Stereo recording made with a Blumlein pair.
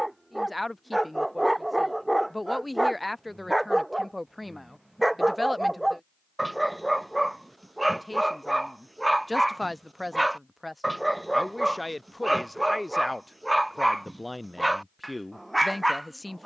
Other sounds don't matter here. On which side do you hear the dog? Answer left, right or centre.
centre.